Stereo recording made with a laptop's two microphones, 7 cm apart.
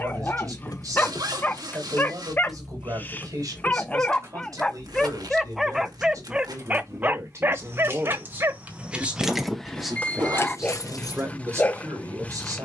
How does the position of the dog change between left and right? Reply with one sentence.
You can hear the dog go right and come back.